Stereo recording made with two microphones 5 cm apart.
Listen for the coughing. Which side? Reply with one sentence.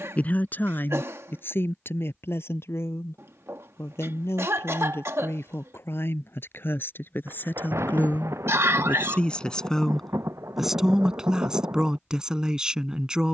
You can hear the coughing on the right.